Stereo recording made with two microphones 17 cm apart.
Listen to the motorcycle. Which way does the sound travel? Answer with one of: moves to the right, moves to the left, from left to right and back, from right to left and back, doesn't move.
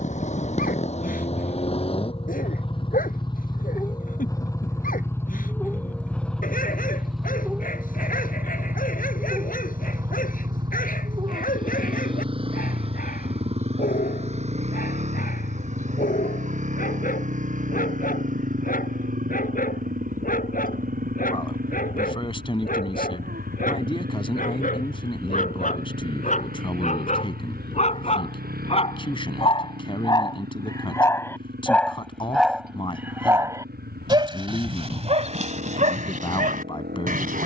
moves to the right.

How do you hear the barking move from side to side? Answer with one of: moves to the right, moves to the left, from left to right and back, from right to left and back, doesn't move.
moves to the right.